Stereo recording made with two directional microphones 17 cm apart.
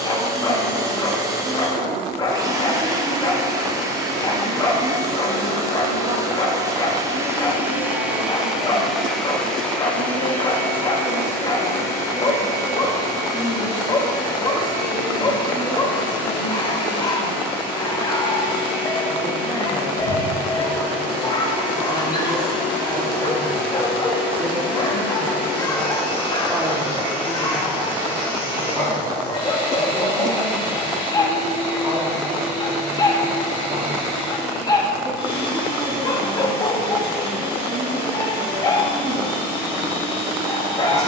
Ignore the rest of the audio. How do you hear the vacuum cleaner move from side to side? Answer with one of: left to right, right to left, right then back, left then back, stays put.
right to left.